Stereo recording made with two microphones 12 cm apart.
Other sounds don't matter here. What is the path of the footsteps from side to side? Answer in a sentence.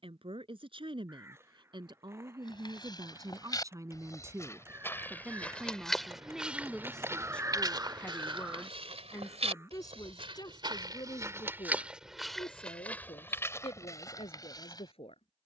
You can hear the footsteps go right and come back.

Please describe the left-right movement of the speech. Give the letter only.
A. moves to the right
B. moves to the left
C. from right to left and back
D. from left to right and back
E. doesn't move
B.